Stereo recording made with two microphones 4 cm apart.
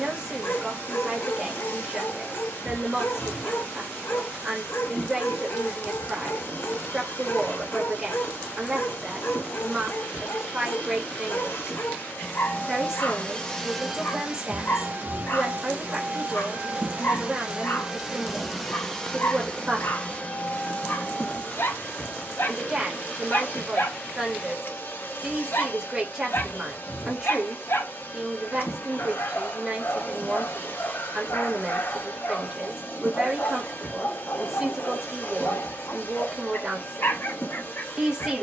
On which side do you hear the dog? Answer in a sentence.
In this clip you hear the dog on the left.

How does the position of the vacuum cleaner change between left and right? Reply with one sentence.
You can hear the vacuum cleaner go right and come back.